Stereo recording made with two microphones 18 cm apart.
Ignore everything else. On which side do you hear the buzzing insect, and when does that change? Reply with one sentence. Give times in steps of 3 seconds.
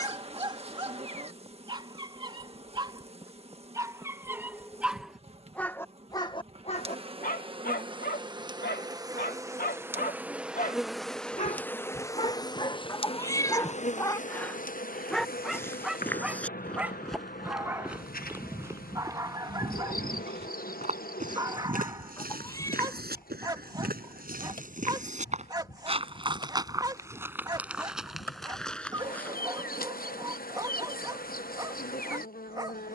You can hear the buzzing insect on the right from 0 s, in the centre from 9 s and on the left from 12 s.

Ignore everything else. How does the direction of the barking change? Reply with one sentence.
In this clip you hear the barking move from right to left and back again.